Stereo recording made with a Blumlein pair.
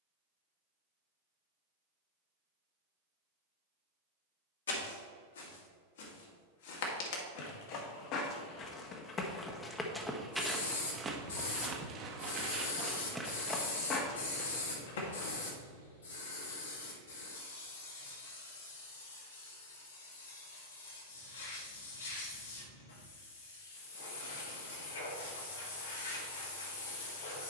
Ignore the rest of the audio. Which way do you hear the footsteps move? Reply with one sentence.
In this clip you hear the footsteps move from left to right and back again.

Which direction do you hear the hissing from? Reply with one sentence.
You can hear the hissing on the left.